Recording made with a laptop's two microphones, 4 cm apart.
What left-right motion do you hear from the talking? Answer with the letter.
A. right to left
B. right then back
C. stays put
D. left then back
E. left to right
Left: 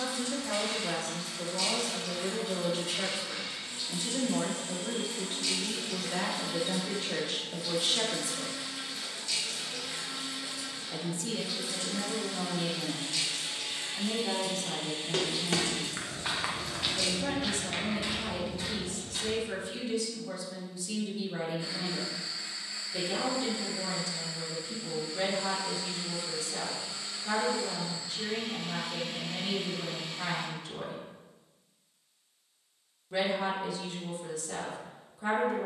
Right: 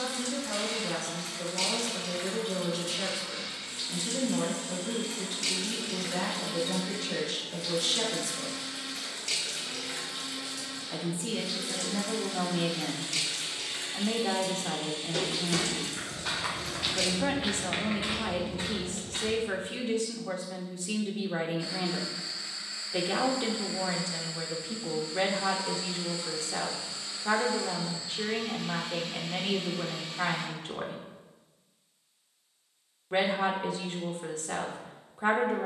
E.